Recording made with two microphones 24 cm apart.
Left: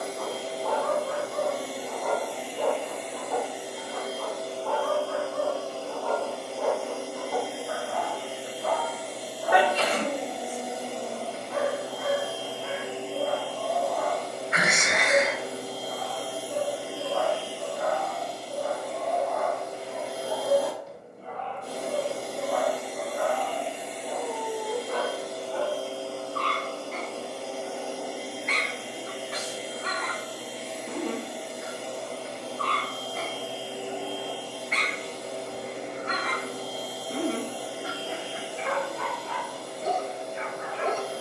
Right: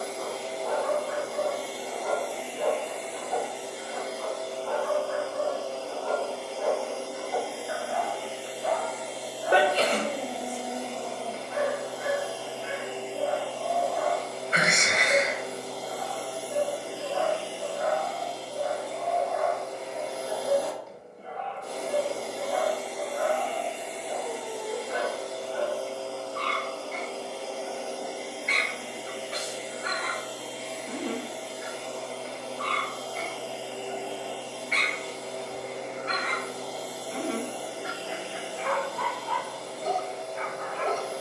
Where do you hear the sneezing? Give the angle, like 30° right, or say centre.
30° right.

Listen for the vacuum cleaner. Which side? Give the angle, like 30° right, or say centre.
30° left.